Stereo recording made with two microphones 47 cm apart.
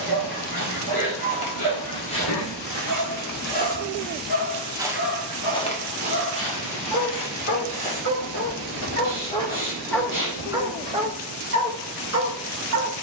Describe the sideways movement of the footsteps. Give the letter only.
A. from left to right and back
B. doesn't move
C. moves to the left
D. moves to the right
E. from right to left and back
A.